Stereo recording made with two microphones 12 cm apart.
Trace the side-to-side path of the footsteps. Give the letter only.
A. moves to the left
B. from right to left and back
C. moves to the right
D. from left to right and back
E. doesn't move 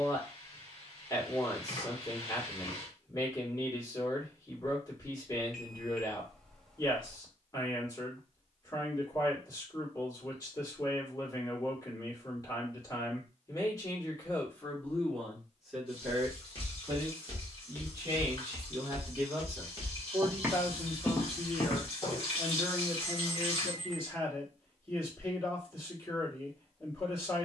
D.